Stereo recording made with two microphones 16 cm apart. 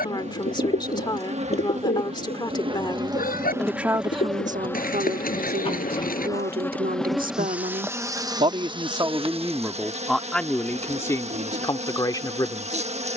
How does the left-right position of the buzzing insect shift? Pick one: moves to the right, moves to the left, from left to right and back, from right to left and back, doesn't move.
from right to left and back.